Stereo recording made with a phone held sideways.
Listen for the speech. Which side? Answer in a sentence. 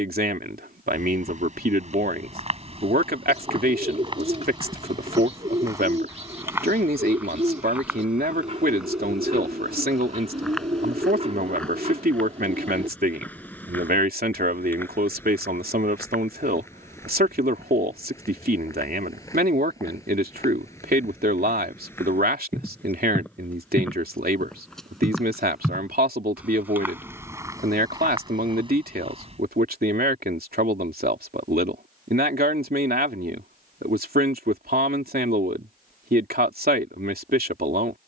You can hear the speech on the right.